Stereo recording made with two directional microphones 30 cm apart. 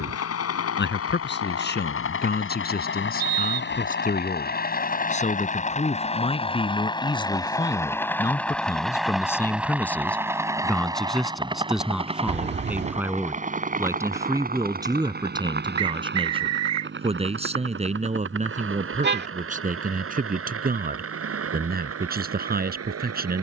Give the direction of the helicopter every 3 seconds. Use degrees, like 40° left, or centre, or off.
50° left, 30° left, 10° left, 10° right, 20° right, 40° right, 40° right, 50° right.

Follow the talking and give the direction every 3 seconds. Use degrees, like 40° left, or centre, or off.
30° left, 30° left, 10° left, centre, 10° right, 20° right, 30° right, 30° right.